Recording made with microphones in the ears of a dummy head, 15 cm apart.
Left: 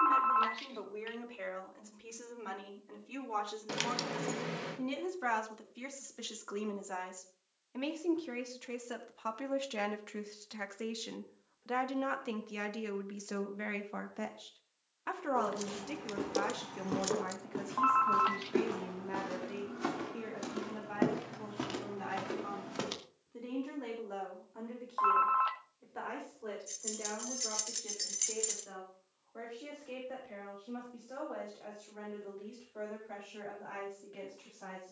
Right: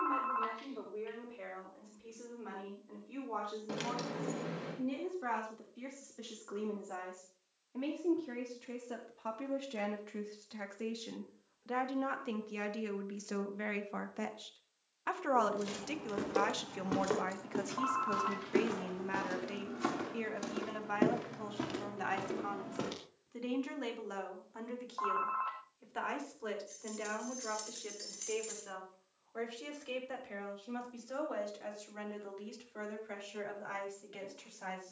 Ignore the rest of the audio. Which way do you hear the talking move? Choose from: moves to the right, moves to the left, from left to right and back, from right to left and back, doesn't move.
moves to the right.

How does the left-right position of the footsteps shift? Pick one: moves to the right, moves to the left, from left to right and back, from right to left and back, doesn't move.
moves to the left.